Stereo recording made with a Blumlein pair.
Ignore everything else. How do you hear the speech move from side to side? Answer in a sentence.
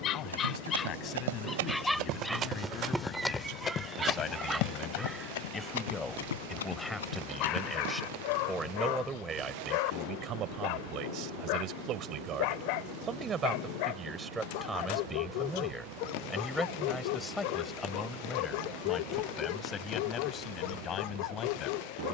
You can hear the speech go right and come back.